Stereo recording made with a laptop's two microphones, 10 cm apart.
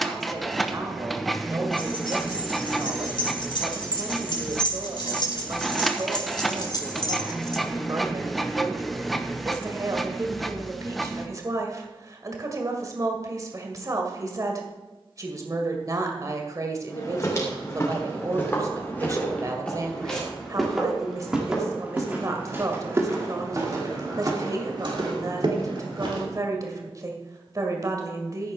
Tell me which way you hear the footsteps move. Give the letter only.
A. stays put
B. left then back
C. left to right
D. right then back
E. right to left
C.